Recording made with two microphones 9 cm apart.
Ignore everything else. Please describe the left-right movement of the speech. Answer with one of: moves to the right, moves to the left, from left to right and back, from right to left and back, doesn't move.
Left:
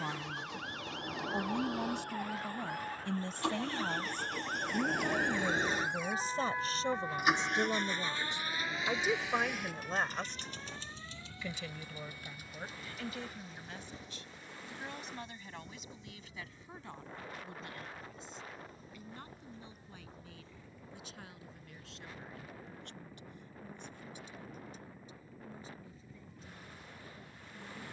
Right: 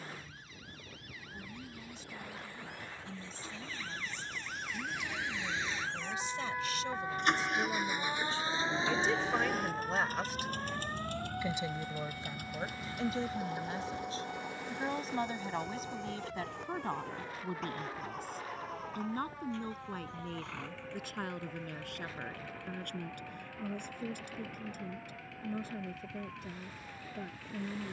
moves to the right.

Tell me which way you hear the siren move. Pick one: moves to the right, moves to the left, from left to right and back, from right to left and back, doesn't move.
moves to the right.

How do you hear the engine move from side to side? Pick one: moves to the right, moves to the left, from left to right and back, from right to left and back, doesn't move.
moves to the right.